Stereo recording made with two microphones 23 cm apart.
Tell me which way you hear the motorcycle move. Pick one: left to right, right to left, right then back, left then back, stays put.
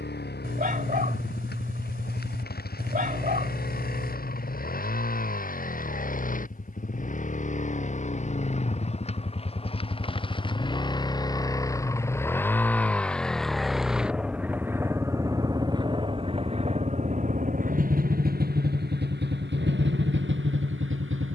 left to right.